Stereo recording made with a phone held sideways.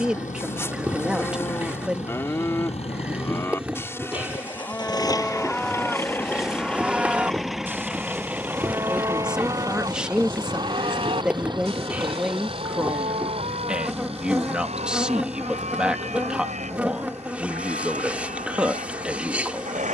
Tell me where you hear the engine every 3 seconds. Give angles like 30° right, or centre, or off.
60° left, 30° left, centre, 30° right, 40° right, 50° right, 60° right.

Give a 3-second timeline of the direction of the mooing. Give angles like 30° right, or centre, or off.
20° left, 10° left, 10° right, 40° right, 60° right, 70° right, 70° right.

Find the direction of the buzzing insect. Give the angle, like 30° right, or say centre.
10° right.